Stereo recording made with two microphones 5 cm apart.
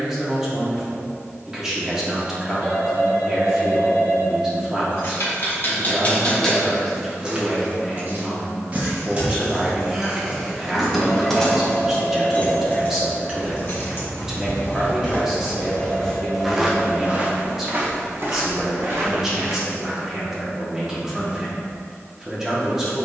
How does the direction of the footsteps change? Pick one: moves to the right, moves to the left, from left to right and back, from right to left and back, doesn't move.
moves to the right.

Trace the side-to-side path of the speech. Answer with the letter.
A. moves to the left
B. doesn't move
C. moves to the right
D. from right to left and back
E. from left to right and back
B.